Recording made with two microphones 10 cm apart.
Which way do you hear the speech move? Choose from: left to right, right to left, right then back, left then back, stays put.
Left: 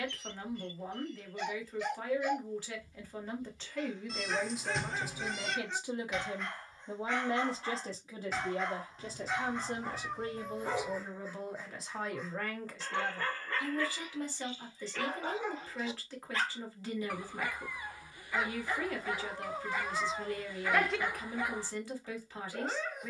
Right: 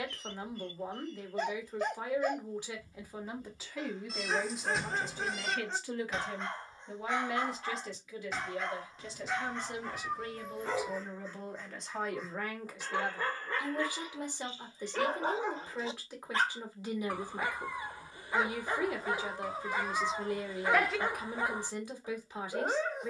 left then back.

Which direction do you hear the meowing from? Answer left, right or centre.
centre.